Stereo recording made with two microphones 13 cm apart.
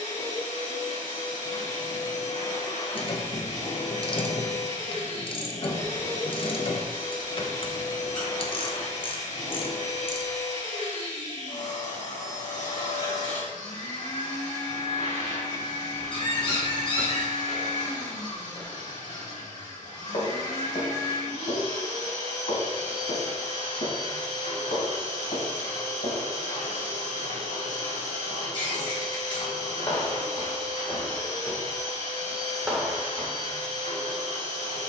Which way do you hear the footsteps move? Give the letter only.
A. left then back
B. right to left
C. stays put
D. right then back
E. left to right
A.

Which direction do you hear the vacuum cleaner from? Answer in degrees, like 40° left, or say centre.
70° left.